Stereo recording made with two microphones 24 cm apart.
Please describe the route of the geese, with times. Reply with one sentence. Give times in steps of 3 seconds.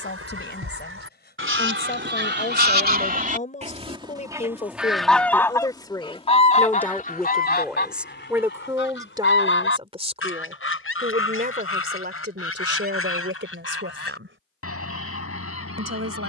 In this clip you hear the geese on the right from 0 s, in the centre from 3 s and on the left from 6 s.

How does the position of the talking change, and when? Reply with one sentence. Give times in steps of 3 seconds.
In this clip you hear the talking on the left from 0 s, in the centre from 6 s and on the right from 9 s.